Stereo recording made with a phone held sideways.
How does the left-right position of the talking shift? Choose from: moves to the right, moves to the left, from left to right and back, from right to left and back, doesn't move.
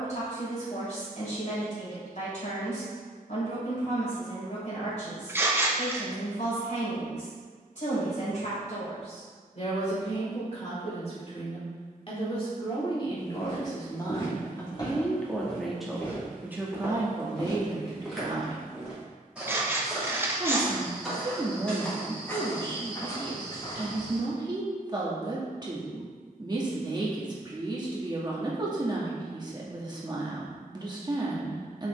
moves to the right.